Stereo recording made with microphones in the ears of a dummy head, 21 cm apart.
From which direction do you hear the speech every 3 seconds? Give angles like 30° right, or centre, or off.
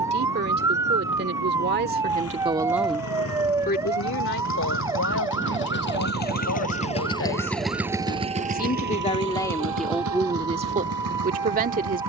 40° right, 60° left, 50° left, 10° right.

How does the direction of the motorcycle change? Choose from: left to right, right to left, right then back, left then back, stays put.
left to right.